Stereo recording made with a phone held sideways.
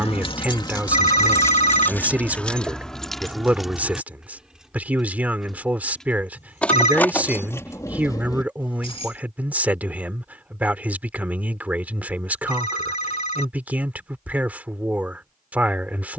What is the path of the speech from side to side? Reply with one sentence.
In this clip you hear the speech stay in one place.